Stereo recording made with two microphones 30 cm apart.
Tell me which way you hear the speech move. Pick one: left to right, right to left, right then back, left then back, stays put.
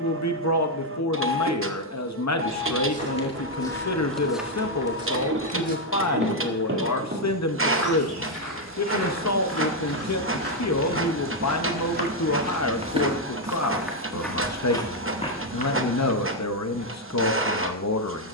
stays put.